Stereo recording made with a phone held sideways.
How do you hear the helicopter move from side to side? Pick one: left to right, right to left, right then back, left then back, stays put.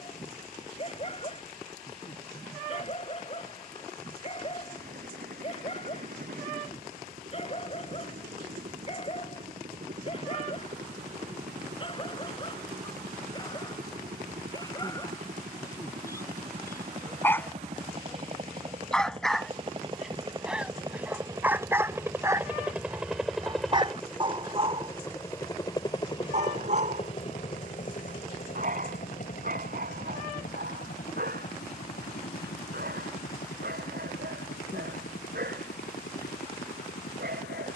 right to left.